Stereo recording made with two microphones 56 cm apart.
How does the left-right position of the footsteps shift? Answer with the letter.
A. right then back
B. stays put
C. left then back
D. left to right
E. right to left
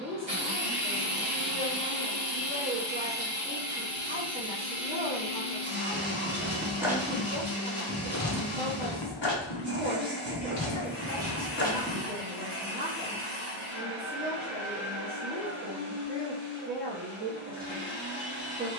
C.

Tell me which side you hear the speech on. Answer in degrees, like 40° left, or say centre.
20° right.